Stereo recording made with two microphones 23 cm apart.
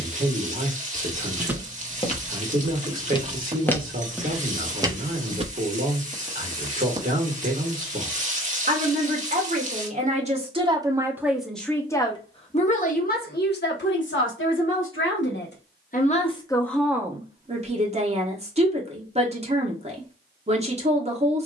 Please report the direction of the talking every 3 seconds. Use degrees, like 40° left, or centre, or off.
40° right, 40° right, 40° right, 20° right, 50° left, 10° left, 30° right.